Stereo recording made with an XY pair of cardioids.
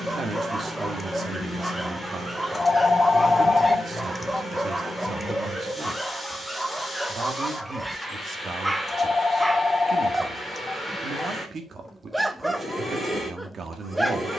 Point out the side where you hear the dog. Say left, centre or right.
centre.